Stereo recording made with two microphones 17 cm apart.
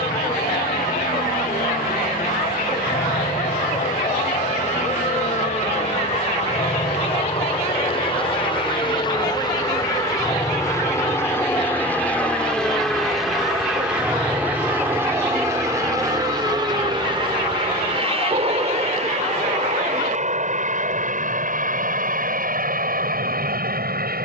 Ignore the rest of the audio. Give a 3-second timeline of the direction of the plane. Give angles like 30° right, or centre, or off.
50° left, 50° left, 40° left, 20° left, centre, 20° right, 40° right, 50° right.